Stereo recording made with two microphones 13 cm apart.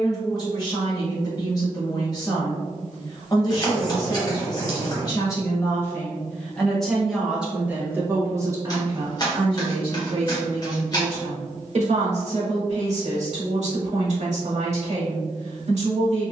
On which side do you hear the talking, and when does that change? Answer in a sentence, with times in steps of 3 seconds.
You can hear the talking on the left from 0 s, in the centre from 6 s and on the right from 9 s.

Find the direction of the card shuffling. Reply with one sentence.
You can hear the card shuffling on the left.